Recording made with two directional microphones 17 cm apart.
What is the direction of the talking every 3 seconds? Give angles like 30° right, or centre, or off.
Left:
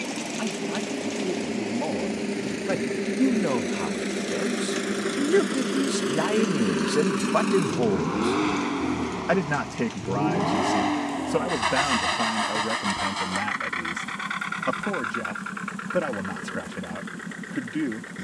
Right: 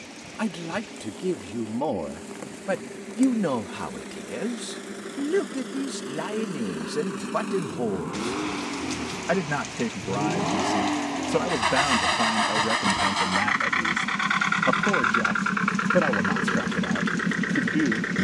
20° right, 10° left, 30° left, centre, 10° right, 20° right.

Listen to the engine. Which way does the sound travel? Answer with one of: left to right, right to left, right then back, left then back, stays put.
left to right.